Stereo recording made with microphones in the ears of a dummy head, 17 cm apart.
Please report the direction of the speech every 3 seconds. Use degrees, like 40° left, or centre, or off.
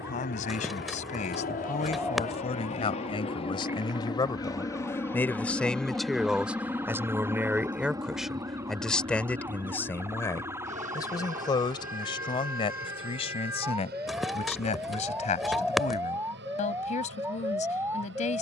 40° left, 20° left, 10° right, 20° left, 30° left, 40° left.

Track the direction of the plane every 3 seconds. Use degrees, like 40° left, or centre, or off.
50° left, 20° left, 10° right, 40° right, 50° right, 60° right.